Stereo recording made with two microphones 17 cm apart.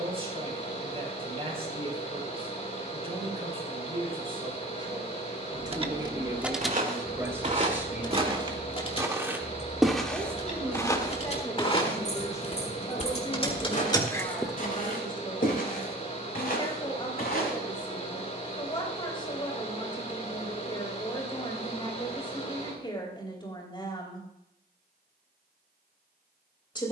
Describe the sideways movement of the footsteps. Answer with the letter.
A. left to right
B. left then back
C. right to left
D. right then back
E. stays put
C.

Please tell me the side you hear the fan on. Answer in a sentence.
In this clip you hear the fan on the left.